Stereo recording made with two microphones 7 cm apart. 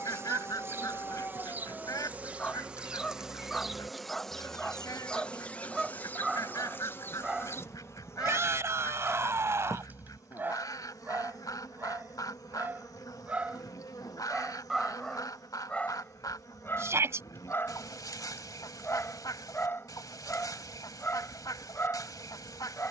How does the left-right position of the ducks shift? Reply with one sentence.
In this clip you hear the ducks stay in one place.